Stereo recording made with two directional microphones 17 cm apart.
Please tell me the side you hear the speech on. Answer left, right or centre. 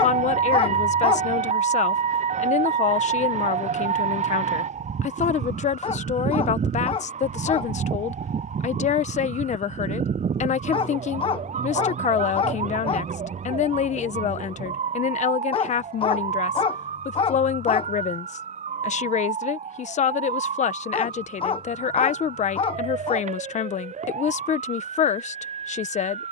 left.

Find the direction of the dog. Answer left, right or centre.
left.